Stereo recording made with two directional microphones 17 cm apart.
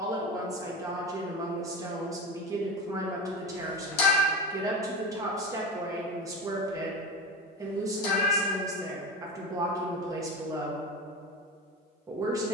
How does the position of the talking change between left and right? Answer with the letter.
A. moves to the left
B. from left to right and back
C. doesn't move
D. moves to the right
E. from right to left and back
C.